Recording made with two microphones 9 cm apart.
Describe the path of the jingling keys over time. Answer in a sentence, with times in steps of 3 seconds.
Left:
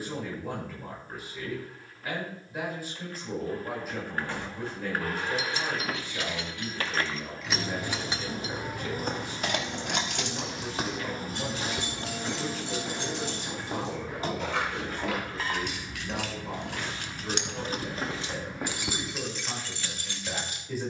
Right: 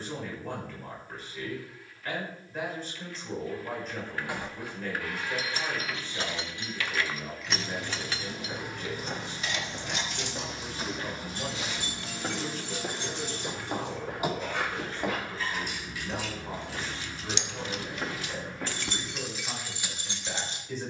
You can hear the jingling keys not at all from 0 s, on the right from 3 s, in the centre from 6 s, on the left from 9 s and in the centre from 18 s.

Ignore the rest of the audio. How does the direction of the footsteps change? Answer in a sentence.
You can hear the footsteps go right and come back.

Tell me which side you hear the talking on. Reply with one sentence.
You can hear the talking in the centre.